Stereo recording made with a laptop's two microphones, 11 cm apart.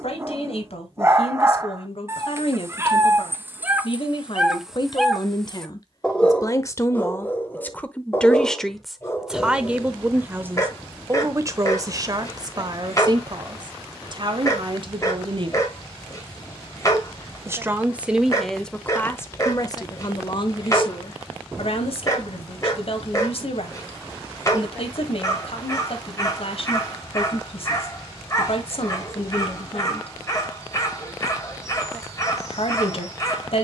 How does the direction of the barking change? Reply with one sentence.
In this clip you hear the barking travel towards the left.